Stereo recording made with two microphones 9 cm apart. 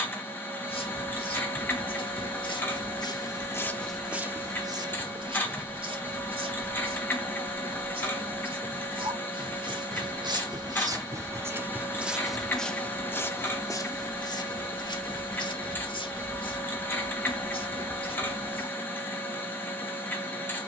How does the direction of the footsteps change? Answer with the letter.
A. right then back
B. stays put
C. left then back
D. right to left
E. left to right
A.